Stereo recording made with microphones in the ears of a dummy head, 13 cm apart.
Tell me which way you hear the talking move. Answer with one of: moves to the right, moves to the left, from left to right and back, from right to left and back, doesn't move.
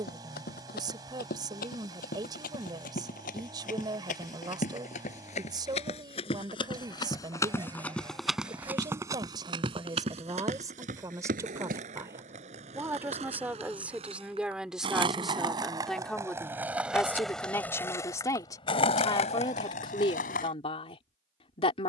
moves to the left.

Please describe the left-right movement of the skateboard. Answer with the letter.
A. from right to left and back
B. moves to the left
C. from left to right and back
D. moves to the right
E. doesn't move
B.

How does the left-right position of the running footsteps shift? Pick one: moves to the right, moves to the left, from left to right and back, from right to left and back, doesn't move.
moves to the right.